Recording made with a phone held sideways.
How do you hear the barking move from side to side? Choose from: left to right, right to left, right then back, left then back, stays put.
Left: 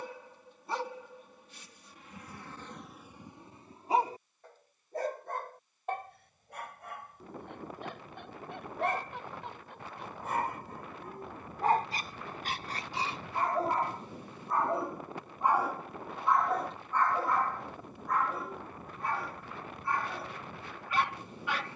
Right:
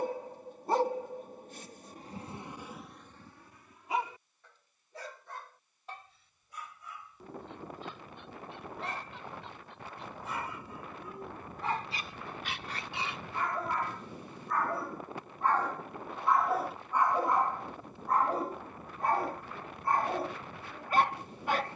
left then back.